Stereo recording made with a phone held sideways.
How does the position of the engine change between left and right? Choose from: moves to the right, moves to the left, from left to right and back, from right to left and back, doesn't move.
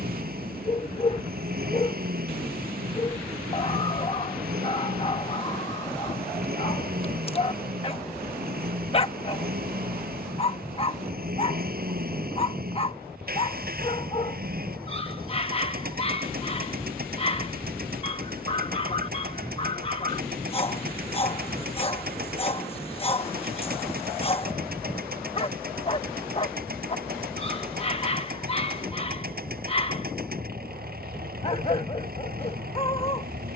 doesn't move.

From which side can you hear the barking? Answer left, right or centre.
left.